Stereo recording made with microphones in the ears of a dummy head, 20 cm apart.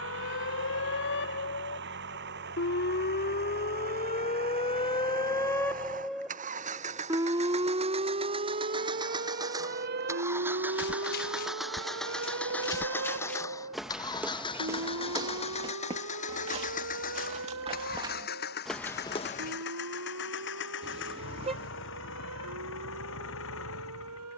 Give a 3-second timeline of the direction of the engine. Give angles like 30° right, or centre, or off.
50° right, 40° right, 30° right, 10° right, 10° left, 30° left, 50° left, 60° left.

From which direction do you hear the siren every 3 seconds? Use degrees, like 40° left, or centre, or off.
60° left, 30° left, 20° right, 50° right, 60° right, 70° right, 70° right, 80° right.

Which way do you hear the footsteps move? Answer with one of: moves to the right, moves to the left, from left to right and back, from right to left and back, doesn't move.
from left to right and back.